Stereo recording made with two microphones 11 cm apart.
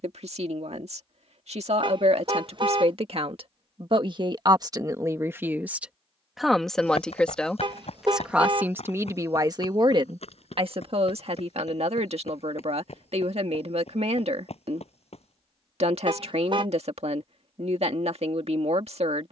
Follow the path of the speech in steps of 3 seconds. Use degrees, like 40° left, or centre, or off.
70° right, 40° right, centre, 50° right, 70° right, 70° right, 70° right.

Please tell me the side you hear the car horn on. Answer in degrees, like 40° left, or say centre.
50° right.